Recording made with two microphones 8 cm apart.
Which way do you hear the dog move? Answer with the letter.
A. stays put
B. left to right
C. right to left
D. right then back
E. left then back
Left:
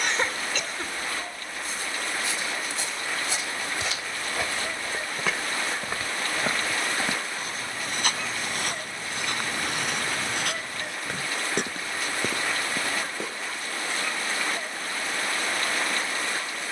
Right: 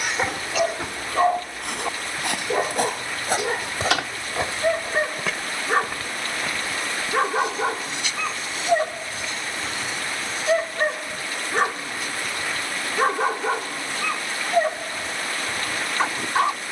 A.